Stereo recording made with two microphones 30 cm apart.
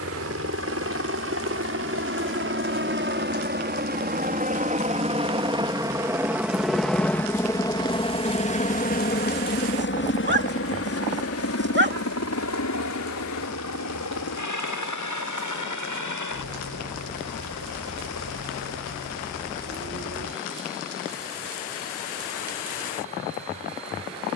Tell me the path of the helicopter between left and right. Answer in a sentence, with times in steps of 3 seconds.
In this clip you hear the helicopter on the right from 0 s, in the centre from 6 s and on the left from 9 s.